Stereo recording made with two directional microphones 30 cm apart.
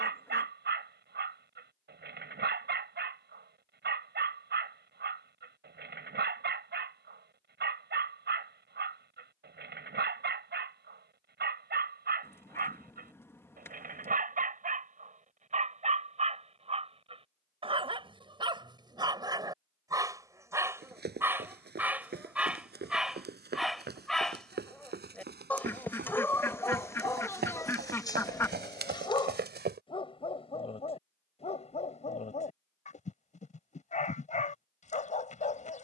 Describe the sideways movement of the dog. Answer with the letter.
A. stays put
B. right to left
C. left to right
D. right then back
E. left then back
B.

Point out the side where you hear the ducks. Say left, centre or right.
centre.